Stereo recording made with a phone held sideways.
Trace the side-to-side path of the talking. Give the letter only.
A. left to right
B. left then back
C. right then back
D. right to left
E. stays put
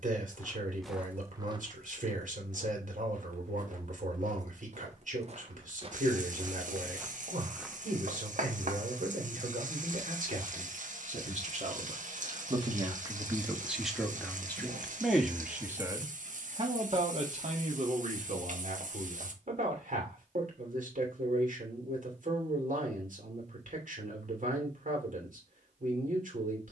B.